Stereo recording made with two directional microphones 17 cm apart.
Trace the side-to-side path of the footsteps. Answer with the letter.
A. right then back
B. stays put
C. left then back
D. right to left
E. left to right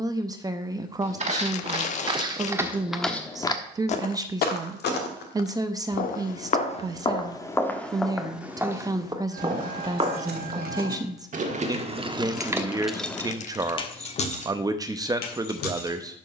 C.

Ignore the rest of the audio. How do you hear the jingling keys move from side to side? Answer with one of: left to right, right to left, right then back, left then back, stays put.
right to left.